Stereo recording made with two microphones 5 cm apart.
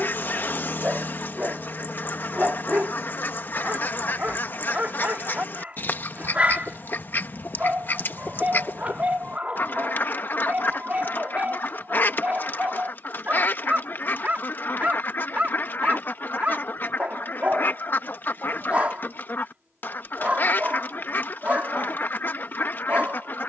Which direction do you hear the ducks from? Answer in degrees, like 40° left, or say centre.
40° left.